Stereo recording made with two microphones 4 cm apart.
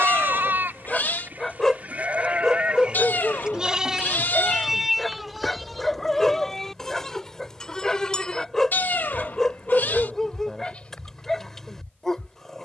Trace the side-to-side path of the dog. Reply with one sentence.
In this clip you hear the dog stay in one place.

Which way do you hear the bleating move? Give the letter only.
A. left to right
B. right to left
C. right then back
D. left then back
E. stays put
B.